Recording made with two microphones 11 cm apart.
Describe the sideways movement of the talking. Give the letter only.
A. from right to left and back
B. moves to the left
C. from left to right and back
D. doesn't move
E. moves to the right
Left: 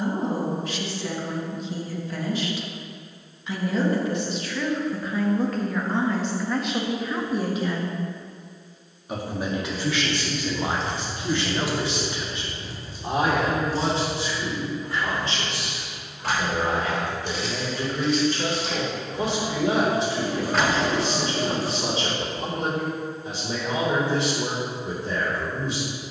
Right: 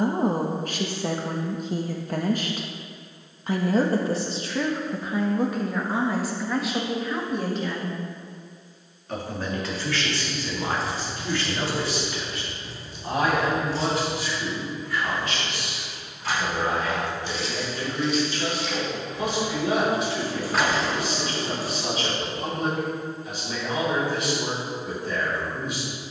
B.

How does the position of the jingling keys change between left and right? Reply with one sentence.
In this clip you hear the jingling keys move from right to left and back again.